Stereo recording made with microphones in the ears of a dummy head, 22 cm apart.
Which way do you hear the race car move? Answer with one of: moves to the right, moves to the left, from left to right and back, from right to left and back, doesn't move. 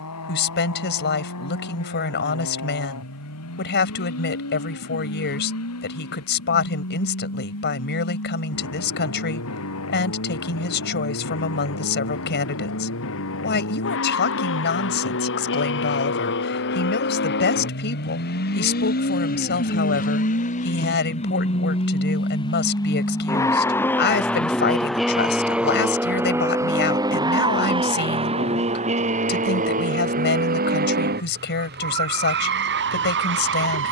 moves to the right.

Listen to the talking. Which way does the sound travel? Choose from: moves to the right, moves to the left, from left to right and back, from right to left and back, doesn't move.
doesn't move.